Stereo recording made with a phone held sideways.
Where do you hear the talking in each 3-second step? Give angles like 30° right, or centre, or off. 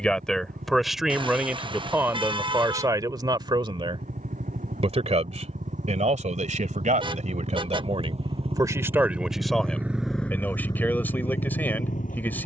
10° right, 40° right, 50° right, 10° left.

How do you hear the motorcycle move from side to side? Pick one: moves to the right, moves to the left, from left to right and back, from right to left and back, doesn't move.
moves to the left.